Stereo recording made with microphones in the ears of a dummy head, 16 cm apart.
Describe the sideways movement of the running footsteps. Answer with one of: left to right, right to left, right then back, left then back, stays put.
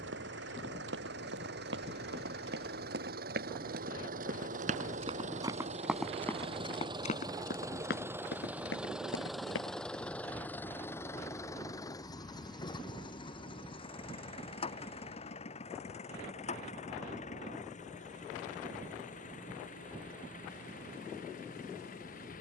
right to left.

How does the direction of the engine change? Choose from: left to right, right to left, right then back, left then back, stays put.
right to left.